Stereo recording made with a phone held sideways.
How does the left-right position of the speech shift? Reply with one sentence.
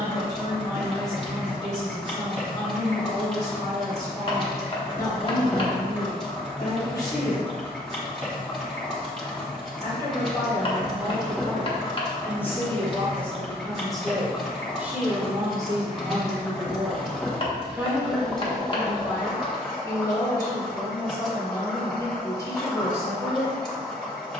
In this clip you hear the speech go right and come back.